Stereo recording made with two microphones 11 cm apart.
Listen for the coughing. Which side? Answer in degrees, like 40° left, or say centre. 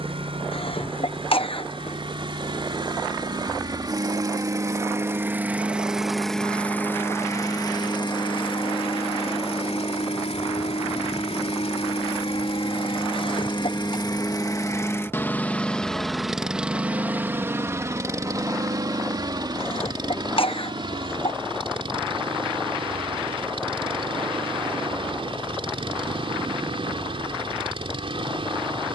60° left.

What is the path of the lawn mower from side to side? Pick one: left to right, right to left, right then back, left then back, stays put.
left then back.